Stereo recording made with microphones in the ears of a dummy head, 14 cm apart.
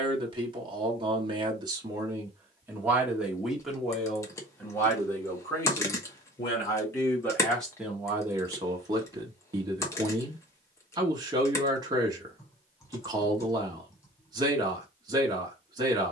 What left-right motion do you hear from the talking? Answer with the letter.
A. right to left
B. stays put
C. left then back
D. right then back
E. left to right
C.